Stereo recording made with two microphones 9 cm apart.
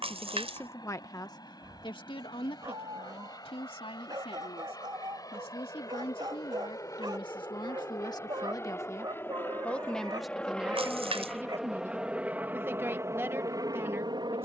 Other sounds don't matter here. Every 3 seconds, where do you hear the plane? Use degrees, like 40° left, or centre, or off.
50° left, 40° left, 30° left, 10° left, 30° right.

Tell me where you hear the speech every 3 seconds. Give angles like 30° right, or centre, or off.
40° left, 70° left, 50° left, 10° right, 20° right.